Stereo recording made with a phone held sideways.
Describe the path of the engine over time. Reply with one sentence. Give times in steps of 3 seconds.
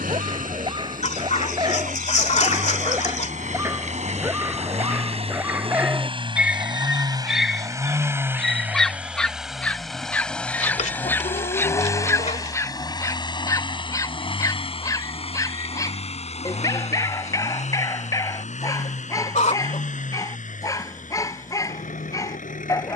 In this clip you hear the engine on the right from 0 s, in the centre from 9 s and on the left from 12 s.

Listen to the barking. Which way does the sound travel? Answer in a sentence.
You can hear the barking go from the right side to the left.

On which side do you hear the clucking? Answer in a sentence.
You can hear the clucking on the left.